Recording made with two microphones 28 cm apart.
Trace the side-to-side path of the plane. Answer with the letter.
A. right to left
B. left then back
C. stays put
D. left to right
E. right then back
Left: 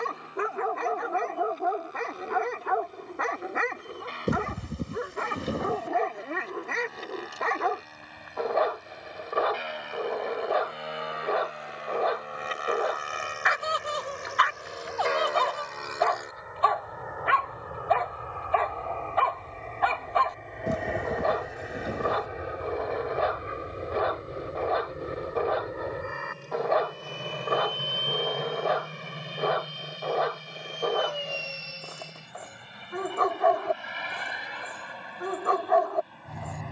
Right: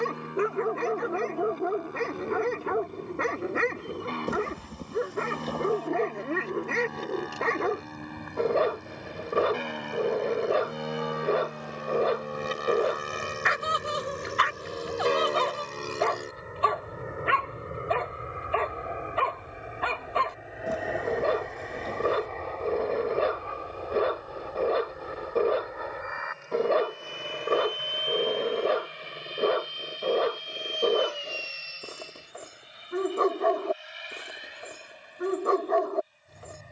A.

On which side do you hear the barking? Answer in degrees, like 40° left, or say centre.
30° right.